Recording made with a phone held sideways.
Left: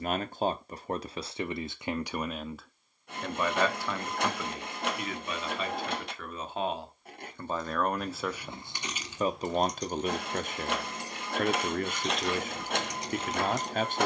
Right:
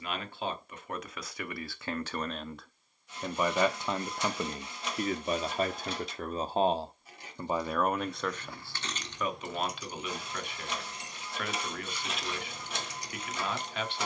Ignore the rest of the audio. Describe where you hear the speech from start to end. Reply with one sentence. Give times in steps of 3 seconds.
You can hear the speech on the left from 0 s, on the right from 3 s, in the centre from 6 s and on the left from 9 s.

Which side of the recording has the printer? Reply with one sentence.
You can hear the printer on the left.